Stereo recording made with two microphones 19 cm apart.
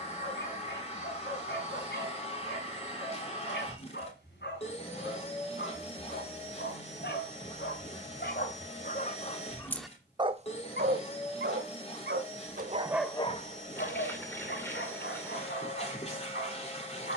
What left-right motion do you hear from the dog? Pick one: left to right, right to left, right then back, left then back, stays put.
right then back.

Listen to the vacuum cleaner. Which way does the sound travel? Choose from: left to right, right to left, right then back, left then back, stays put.
stays put.